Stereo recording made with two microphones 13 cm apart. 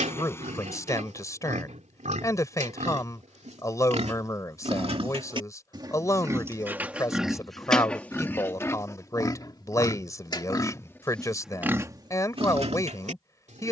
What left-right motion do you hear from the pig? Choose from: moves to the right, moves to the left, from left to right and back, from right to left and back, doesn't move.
from right to left and back.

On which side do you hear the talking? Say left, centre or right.
left.